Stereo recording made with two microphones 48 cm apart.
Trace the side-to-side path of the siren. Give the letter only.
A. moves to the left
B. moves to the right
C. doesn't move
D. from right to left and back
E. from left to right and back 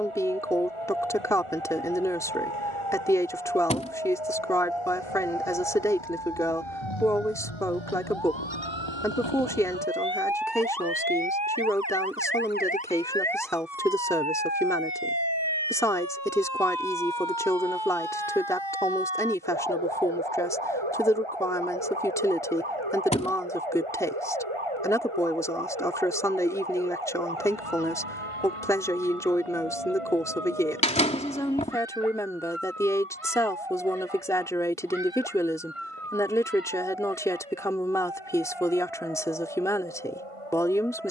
B.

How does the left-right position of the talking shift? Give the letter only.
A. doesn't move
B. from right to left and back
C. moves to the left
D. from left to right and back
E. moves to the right
A.